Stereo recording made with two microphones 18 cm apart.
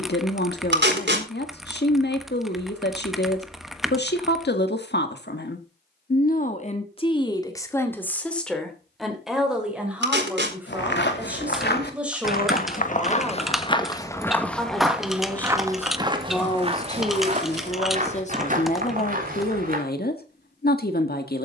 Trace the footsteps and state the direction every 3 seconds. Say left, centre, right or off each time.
off, off, off, left, left, right, right.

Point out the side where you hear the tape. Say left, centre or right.
right.